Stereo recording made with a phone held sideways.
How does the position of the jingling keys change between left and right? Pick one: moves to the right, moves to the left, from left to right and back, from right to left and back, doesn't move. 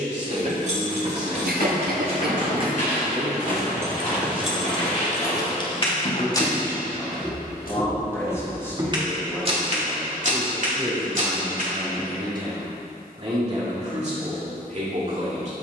moves to the left.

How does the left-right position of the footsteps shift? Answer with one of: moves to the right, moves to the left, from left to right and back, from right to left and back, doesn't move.
moves to the right.